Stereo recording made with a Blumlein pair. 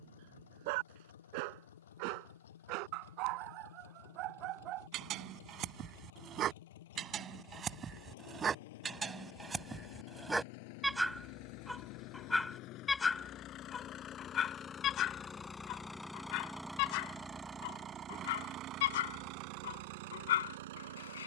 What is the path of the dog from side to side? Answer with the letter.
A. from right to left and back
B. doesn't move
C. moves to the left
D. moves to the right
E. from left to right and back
C.